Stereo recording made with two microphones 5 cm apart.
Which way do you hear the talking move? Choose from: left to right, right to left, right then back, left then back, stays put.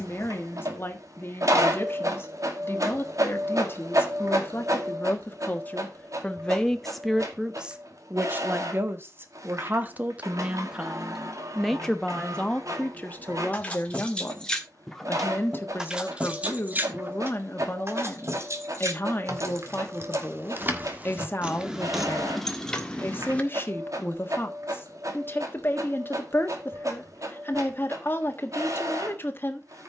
right then back.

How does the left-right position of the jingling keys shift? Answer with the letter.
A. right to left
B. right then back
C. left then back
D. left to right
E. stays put
B.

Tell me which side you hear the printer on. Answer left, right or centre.
right.